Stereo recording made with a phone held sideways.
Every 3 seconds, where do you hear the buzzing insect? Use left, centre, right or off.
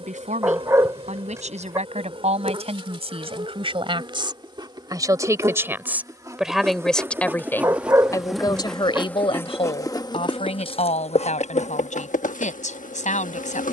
right, right, centre, left, left.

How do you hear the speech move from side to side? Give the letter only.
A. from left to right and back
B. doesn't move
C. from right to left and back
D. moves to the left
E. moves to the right
D.